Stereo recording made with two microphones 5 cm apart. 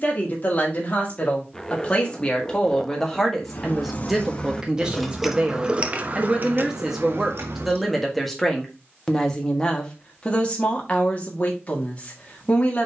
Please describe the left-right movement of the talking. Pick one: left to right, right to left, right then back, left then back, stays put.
right then back.